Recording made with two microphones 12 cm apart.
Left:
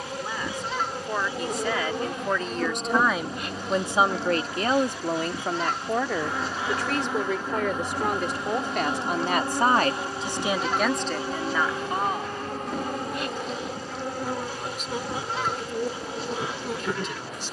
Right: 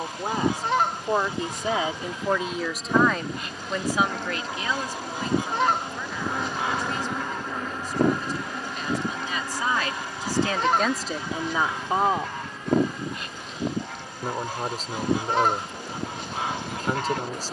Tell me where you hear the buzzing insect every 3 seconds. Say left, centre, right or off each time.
left, centre, centre, left, left, left.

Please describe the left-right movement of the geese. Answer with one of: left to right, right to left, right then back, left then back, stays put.
stays put.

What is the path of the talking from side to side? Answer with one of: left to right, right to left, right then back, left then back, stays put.
left then back.